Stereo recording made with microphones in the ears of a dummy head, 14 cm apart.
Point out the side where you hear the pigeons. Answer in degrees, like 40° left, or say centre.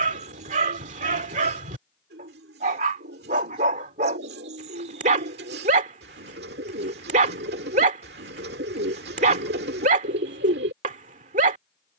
70° right.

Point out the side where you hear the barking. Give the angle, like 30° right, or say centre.
50° right.